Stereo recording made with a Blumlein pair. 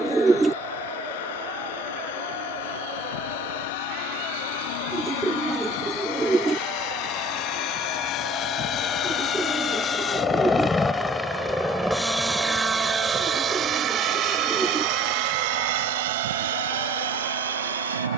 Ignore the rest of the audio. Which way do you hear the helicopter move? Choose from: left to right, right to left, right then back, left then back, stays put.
left to right.